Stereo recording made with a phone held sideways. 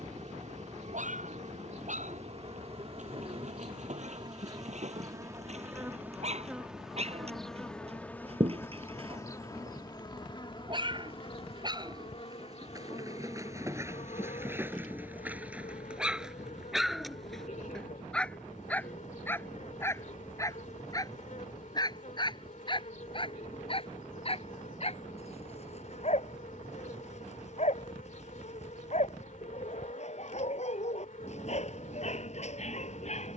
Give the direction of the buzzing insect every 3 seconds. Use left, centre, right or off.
right, right, centre, left, left, left, left, left, left, left, left.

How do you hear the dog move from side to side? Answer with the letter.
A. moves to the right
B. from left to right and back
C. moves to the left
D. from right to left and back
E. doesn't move
C.